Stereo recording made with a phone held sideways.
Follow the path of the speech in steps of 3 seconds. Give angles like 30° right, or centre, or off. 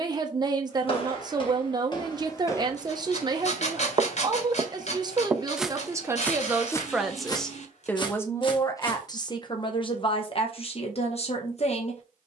30° right, 30° right, centre, 40° left.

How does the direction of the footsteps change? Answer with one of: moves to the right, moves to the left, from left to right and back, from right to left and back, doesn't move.
from left to right and back.